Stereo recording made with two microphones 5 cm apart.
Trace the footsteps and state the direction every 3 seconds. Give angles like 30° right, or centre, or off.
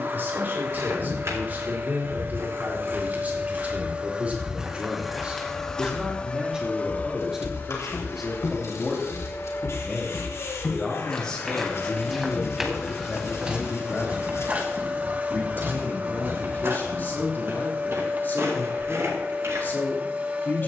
60° right, 10° right, 40° left, 20° left, 20° right, 50° right, 60° right.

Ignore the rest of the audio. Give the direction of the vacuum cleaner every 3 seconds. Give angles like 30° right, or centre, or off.
50° right, 10° right, 40° left, 50° left, 10° right, 30° right, 30° right.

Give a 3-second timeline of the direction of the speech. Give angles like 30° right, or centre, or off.
40° right, 30° right, 10° right, 10° left, 30° left, 40° left, 40° left.